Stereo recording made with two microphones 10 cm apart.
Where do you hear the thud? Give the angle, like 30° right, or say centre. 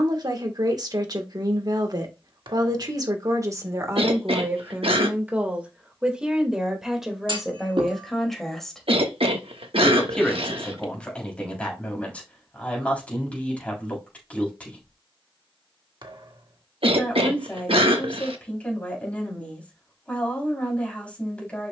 50° right.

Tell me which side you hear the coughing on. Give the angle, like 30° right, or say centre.
70° right.